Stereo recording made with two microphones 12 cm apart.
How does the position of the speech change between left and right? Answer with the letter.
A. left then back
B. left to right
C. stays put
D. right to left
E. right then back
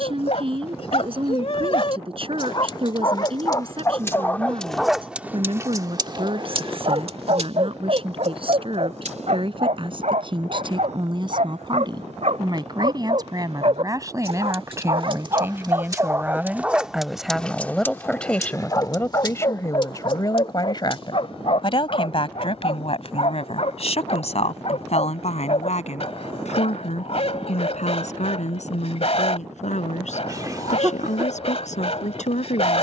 D.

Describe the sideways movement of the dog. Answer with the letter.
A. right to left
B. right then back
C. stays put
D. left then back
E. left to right
B.